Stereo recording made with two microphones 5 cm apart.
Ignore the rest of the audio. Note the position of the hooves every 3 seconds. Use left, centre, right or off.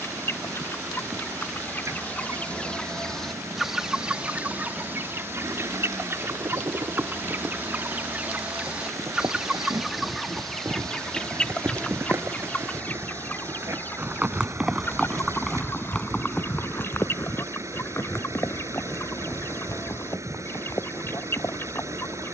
off, off, right, right, right, left, left, left.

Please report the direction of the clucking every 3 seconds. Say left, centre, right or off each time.
left, right, right, centre, left, left, left, left.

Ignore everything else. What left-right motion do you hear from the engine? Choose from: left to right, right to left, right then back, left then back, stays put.
stays put.